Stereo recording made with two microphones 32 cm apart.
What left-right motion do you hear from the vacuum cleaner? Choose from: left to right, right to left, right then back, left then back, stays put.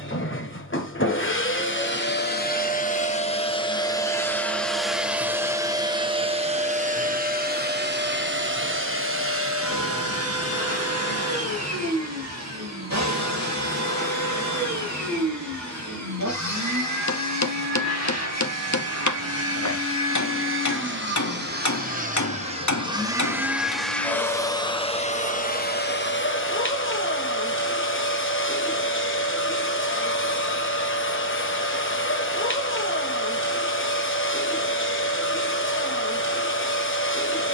right then back.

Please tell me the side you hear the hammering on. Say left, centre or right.
left.